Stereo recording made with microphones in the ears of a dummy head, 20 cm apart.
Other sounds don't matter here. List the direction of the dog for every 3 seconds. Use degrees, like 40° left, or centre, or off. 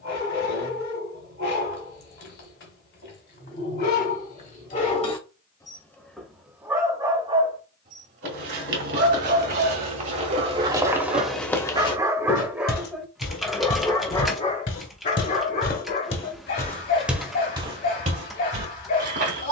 50° left, 40° left, 20° right, 40° right, 10° left, 50° left, 50° left.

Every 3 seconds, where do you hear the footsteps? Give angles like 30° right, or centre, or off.
off, off, 50° right, 20° right, 50° left, 20° left, 40° right.